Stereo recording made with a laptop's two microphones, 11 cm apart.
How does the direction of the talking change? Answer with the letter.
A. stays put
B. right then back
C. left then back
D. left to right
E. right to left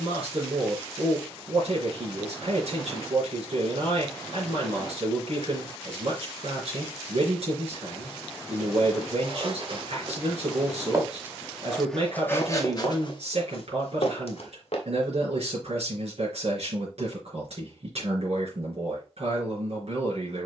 A.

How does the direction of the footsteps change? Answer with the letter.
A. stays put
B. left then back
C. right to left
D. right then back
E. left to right
C.